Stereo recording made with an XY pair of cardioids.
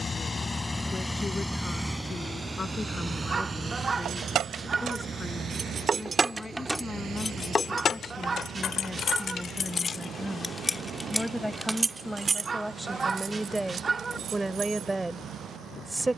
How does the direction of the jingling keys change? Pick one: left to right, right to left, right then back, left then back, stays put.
left then back.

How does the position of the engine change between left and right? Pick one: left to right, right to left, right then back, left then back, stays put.
left to right.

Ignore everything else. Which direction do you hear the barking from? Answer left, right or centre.
right.